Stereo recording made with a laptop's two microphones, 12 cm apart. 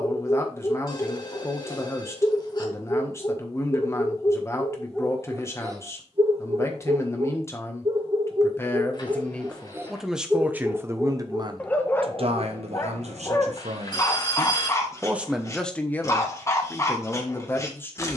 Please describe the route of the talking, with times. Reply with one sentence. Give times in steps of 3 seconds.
You can hear the talking on the left from 0 s, in the centre from 9 s, on the right from 12 s and in the centre from 15 s.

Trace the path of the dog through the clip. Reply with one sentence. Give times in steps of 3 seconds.
You can hear the dog on the left from 0 s, in the centre from 3 s, on the right from 6 s, in the centre from 9 s and on the left from 12 s.